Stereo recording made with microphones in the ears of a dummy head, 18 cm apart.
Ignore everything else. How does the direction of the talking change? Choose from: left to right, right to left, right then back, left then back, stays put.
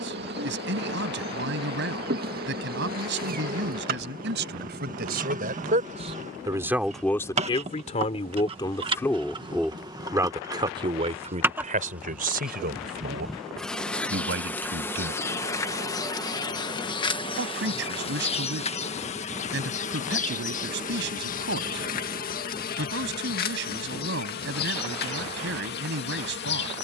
left then back.